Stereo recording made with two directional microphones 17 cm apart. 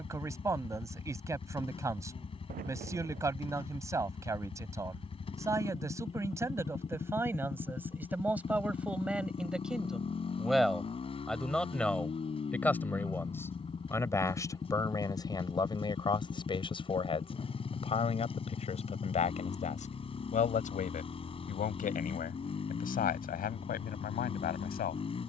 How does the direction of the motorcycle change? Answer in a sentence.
You can hear the motorcycle stay put.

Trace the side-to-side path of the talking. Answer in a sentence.
You can hear the talking go from the right side to the left.